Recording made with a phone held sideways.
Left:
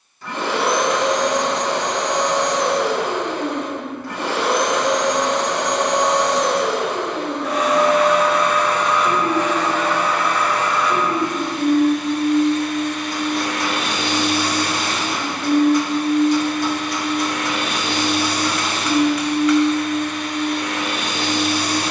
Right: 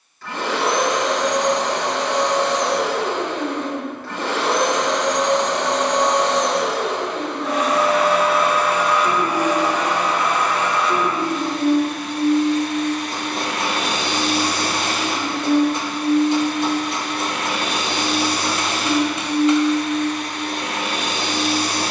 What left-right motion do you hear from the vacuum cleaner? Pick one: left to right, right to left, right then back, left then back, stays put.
left to right.